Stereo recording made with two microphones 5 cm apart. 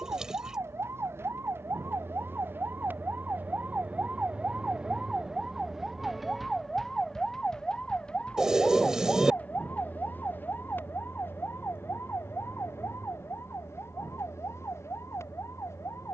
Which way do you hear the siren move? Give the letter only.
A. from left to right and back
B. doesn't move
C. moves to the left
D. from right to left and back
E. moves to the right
C.